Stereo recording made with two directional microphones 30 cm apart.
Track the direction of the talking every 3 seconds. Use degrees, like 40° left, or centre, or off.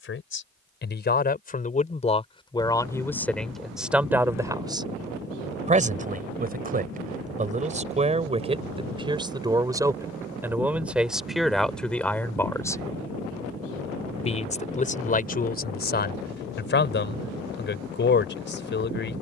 30° left, 10° right, 20° right, 10° right, 20° left, 30° left, 40° left.